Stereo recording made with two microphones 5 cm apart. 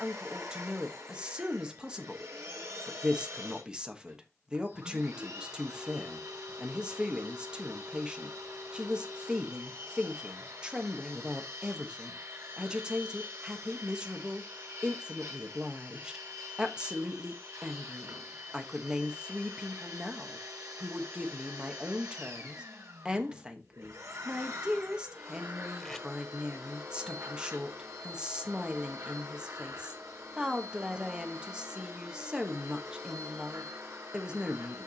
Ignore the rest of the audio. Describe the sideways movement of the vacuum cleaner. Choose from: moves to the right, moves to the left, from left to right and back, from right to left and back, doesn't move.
doesn't move.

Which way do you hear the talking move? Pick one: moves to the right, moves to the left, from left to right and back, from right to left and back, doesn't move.
doesn't move.